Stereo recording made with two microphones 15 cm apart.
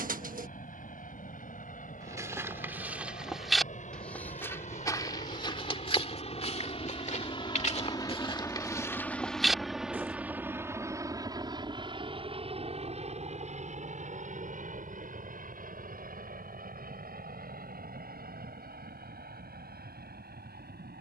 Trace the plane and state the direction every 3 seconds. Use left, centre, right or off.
left, left, left, centre, right, right, right.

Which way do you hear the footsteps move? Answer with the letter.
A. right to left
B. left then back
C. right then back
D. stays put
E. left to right
B.